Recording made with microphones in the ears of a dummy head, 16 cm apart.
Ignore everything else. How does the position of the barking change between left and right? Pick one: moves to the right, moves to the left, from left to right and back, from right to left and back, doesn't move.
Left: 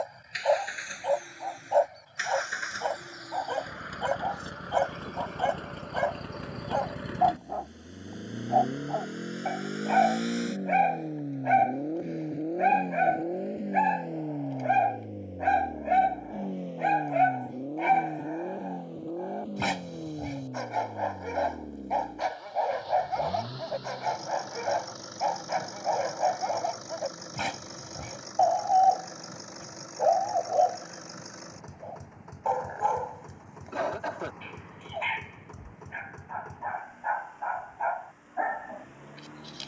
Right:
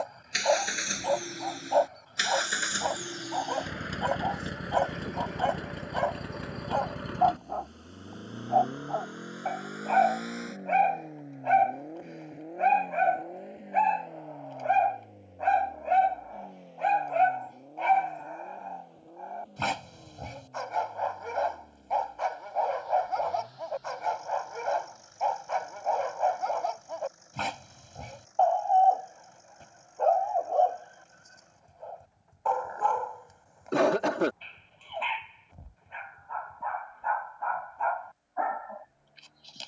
doesn't move.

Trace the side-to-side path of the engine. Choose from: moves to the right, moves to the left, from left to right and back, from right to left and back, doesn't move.
moves to the left.